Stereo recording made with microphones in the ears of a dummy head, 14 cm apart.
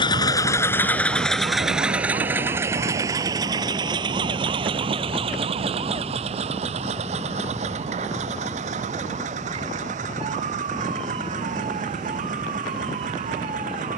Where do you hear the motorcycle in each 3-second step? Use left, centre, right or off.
centre, right, right, right, right.